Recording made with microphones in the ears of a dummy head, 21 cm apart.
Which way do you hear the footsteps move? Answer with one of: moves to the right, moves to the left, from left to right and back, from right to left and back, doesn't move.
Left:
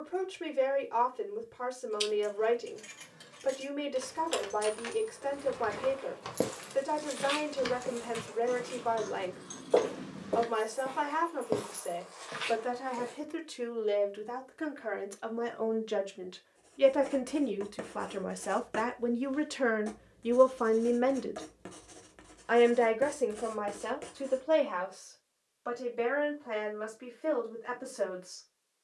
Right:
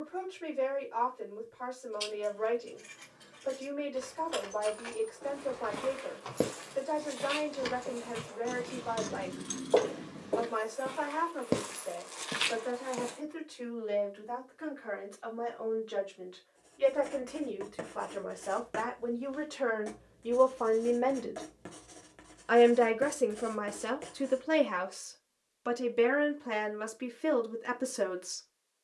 from right to left and back.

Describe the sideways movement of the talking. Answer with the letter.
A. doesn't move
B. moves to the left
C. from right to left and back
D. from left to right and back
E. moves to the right
E.